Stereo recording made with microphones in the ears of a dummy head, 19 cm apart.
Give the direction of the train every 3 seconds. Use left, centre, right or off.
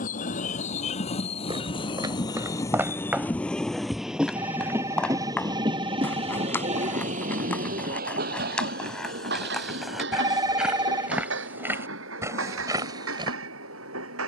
left, centre, right, right, right.